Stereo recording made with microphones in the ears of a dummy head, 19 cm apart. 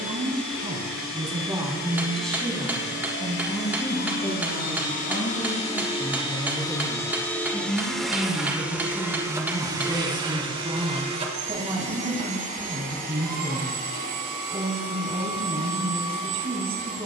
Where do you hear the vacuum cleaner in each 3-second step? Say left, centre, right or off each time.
left, left, centre, right, right, right.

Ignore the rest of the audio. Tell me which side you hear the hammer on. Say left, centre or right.
centre.